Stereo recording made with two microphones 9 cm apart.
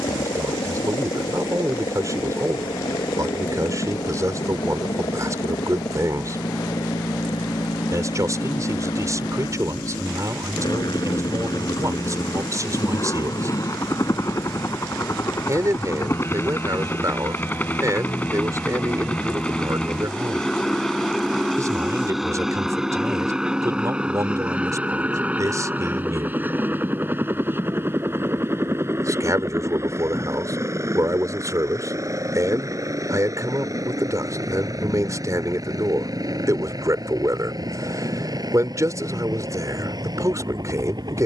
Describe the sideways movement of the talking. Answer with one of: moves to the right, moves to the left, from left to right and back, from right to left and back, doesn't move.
doesn't move.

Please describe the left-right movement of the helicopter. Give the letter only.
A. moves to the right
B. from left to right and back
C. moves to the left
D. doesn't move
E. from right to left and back
A.